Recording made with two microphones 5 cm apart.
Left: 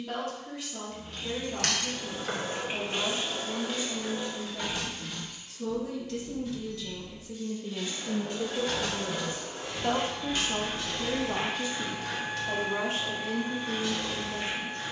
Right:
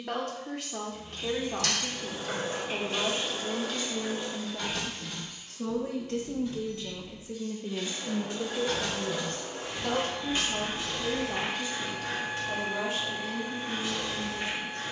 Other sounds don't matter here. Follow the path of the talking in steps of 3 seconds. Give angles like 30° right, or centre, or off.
60° right, 60° right, 20° right, 30° left, 50° left.